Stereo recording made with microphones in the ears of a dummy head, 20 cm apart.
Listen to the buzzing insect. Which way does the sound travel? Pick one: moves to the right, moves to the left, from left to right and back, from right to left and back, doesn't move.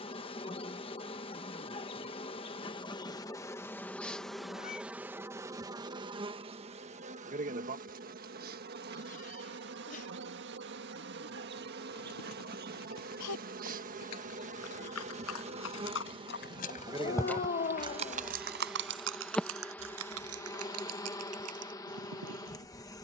from left to right and back.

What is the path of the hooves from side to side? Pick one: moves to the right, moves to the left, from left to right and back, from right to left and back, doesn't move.
moves to the right.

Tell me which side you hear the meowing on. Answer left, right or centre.
left.